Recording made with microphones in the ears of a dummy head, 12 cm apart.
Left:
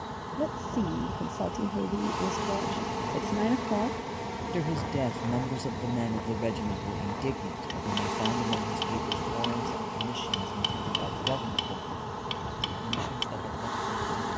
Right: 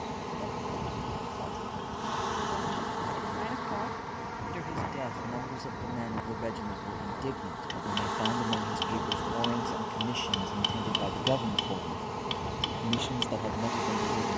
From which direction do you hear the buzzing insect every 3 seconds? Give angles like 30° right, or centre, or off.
centre, 30° left, 20° left, centre, 10° right.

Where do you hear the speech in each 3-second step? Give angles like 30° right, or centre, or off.
50° left, 40° left, 10° left, 10° right, 30° right.